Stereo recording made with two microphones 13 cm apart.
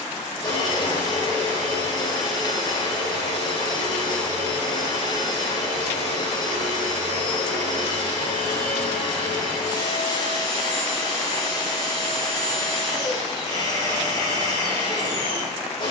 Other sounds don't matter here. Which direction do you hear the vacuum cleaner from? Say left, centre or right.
left.